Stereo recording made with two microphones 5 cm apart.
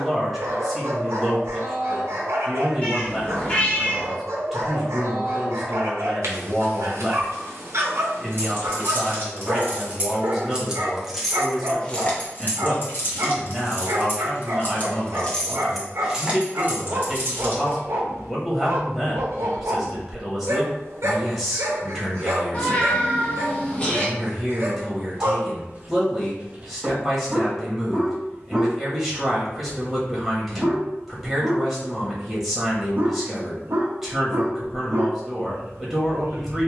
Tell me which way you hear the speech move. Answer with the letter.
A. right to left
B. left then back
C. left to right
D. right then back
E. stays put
E.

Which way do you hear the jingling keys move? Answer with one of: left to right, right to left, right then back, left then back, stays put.
left then back.